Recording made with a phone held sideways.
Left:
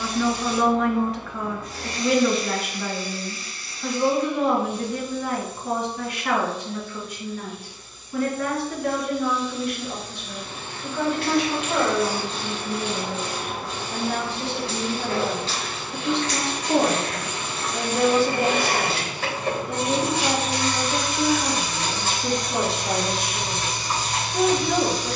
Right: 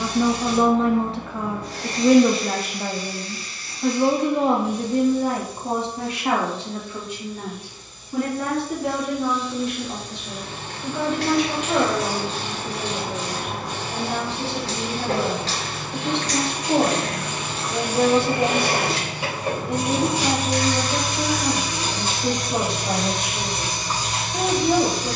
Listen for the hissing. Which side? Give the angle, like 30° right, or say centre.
80° right.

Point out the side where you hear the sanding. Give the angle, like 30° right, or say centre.
10° right.